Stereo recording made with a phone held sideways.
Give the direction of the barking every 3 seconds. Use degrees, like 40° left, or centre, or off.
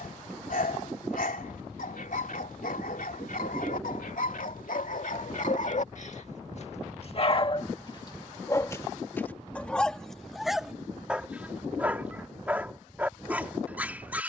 80° left, 70° left, 40° left, centre, 10° right.